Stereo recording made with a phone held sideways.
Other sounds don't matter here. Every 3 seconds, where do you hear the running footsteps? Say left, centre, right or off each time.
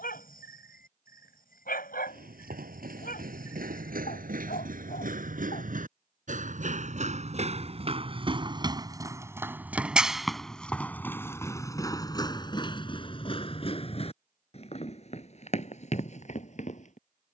right, right, right, centre, left, left.